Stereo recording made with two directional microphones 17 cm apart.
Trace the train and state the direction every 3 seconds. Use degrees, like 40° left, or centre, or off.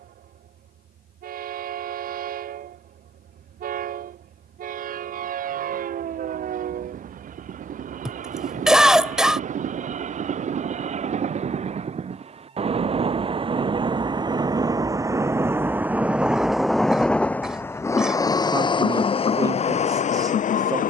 60° right, 60° right, 50° right, 50° right, 30° right, centre, 40° left.